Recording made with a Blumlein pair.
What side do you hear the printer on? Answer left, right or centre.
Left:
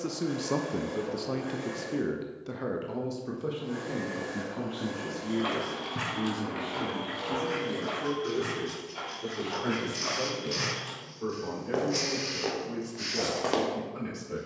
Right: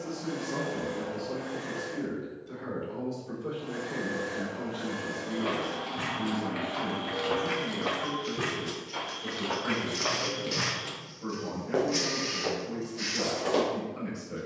centre.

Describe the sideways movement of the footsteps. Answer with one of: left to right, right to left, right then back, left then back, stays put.
right then back.